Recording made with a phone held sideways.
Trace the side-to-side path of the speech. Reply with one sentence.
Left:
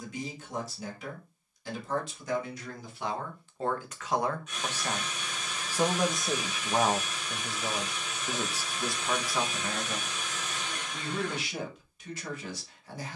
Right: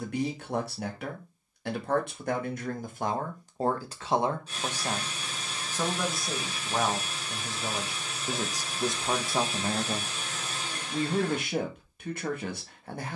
In this clip you hear the speech go left and come back.